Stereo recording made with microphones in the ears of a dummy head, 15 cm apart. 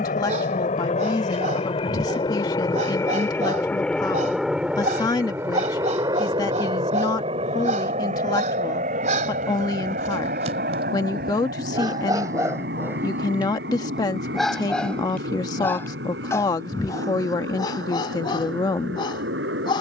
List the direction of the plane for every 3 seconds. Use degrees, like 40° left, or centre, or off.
30° left, centre, 30° right, 50° right, 60° right, 70° right, 70° right.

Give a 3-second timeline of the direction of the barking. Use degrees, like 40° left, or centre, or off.
50° right, 50° right, 50° right, 40° right, 10° right, 20° left, 30° left.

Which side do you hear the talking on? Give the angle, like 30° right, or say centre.
20° left.